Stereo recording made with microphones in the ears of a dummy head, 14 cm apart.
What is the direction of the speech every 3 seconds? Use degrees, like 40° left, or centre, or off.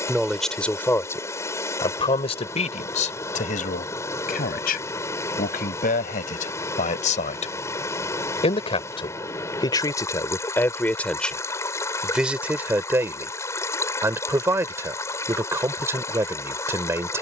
20° left, 60° left, 50° left, 20° left, 10° right, 20° right.